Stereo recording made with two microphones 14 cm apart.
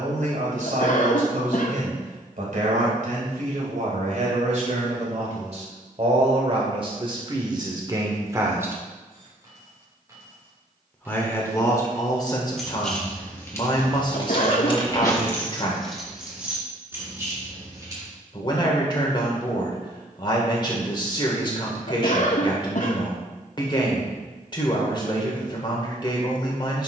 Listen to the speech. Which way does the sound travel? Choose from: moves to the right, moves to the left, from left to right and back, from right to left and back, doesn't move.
moves to the left.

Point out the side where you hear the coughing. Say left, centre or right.
left.